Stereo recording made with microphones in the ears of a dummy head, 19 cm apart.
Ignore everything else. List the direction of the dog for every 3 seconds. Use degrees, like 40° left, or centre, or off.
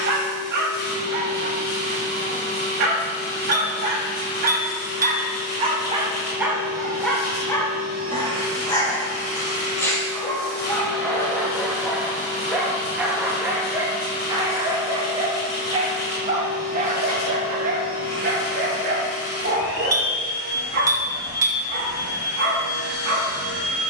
50° right, 40° right, 10° left, 10° left, 10° right, 30° right, 50° right, 50° right.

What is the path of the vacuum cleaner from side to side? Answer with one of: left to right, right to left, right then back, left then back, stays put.
stays put.